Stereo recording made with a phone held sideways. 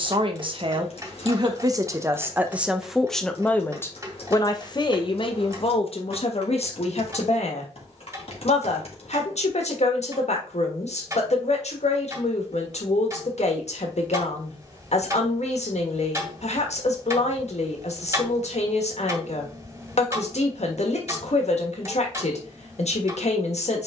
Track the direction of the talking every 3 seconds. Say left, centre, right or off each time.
right, left, left, left, left, left, left, left.